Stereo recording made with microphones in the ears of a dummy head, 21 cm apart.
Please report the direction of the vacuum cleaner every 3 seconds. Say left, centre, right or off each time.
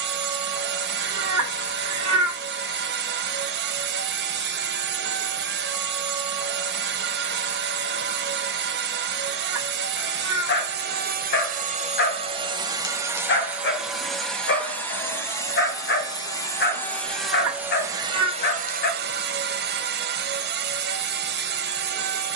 right, right, right, right, centre, centre, right, right.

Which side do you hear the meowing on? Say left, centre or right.
right.